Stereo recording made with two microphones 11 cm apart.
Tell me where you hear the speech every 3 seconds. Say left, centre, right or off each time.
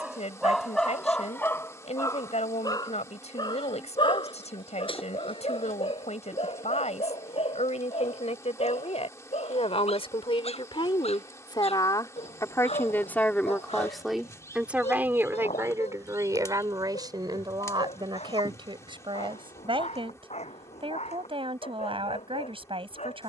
left, left, left, left, centre, right, right, right.